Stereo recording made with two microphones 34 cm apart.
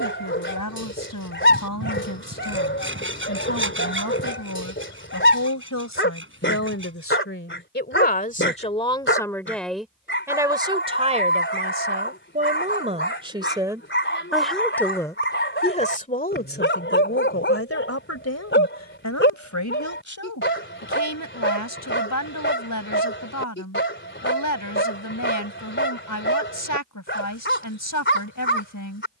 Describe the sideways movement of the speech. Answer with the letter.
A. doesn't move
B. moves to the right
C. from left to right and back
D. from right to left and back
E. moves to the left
C.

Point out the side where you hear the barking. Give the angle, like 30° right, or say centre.
30° left.